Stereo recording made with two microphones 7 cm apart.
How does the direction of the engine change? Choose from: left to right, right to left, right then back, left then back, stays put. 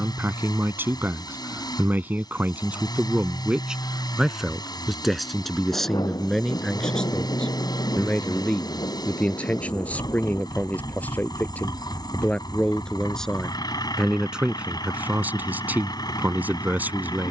stays put.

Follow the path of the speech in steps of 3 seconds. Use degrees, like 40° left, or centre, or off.
30° right, 10° right, 10° left, 20° left, centre, 20° right.